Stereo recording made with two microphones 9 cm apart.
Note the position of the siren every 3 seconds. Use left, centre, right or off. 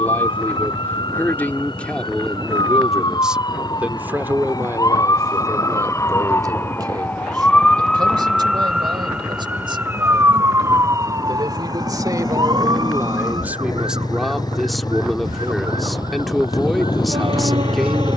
left, left, centre, right, right, right.